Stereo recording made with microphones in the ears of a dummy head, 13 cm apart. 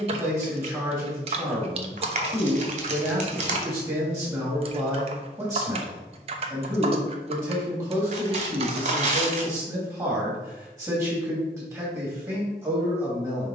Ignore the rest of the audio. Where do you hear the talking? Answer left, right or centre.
right.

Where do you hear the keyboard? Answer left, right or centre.
right.